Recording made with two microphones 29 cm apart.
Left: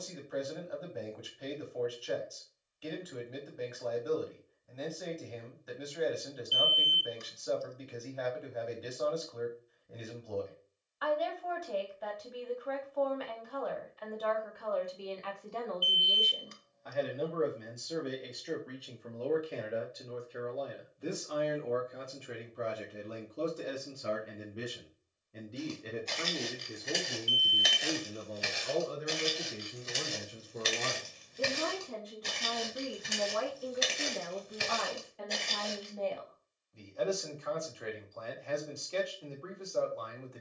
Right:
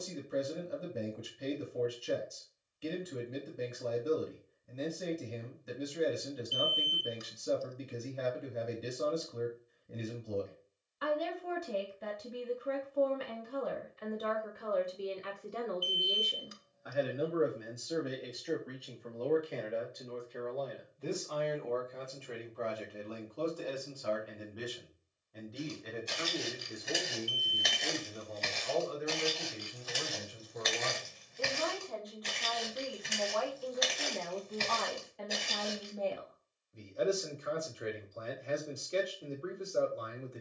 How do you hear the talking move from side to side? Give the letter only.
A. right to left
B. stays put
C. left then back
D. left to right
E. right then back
C.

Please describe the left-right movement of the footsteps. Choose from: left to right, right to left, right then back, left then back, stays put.
left then back.